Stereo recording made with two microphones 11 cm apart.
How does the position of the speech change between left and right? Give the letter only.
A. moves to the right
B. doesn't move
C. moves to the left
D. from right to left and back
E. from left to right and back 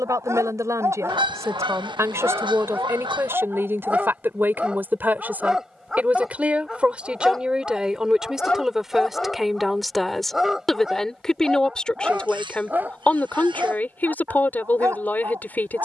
C.